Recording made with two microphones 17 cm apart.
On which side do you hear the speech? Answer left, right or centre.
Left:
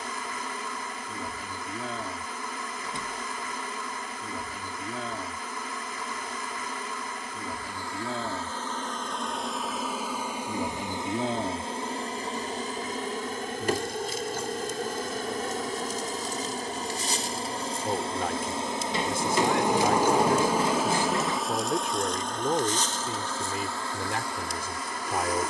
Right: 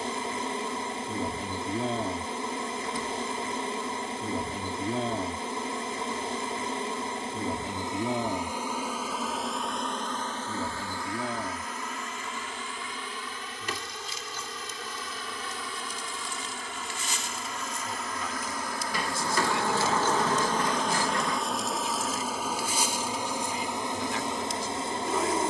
left.